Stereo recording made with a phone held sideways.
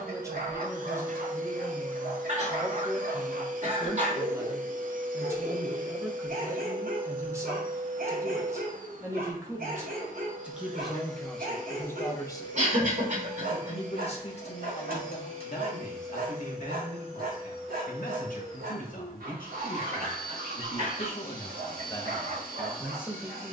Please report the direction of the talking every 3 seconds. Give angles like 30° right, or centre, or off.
20° right, 20° right, 20° right, centre, 40° left, 60° left, 60° left, 20° left.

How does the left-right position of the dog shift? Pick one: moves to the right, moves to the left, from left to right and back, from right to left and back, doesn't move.
doesn't move.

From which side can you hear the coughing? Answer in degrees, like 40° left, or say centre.
60° right.